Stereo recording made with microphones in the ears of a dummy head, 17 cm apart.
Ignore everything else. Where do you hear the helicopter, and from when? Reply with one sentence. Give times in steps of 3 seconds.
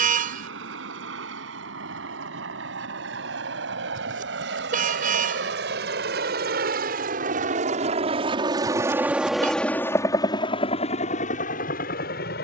You can hear the helicopter on the right from 0 s and on the left from 9 s.